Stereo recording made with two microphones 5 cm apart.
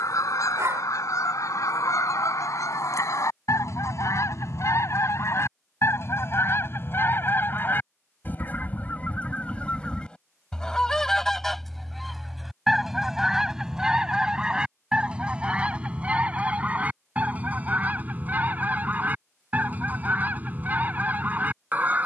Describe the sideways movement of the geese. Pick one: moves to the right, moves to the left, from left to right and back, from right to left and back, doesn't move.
moves to the right.